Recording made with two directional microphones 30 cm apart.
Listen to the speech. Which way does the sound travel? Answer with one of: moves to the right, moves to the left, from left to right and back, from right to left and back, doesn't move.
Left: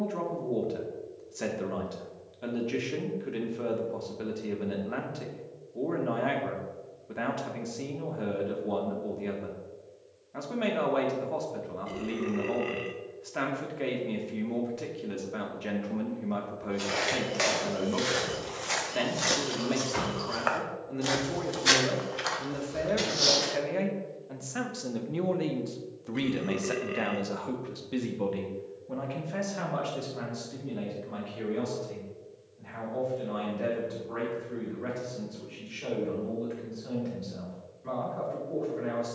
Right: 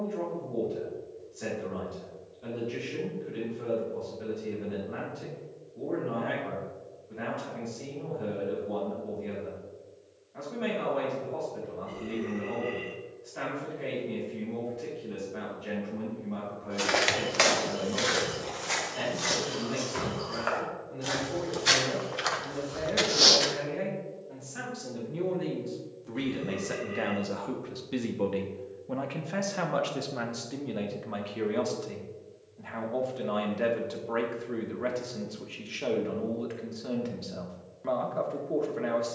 moves to the right.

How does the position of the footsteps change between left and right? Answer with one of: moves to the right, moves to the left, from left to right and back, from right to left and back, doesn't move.
from right to left and back.